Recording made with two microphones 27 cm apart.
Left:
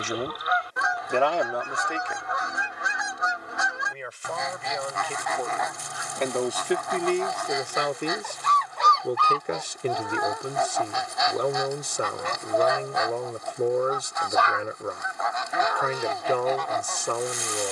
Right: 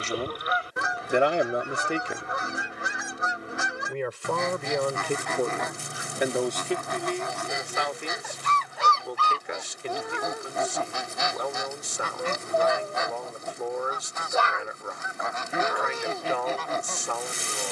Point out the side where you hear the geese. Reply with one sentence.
You can hear the geese on the right.